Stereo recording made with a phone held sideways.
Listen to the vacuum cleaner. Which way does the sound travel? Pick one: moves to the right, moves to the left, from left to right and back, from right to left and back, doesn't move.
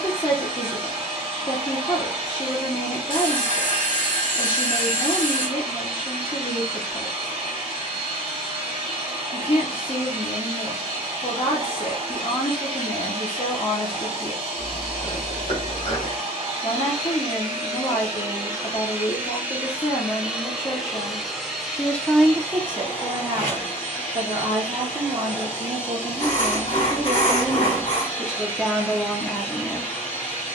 moves to the left.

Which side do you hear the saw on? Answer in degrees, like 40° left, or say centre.
70° left.